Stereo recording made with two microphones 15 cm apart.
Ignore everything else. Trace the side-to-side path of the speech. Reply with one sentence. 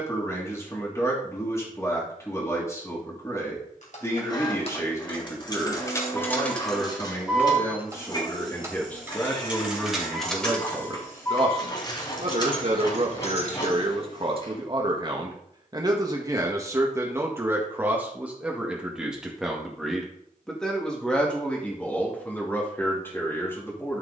In this clip you hear the speech move from left to right and back again.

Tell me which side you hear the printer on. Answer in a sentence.
You can hear the printer on the left.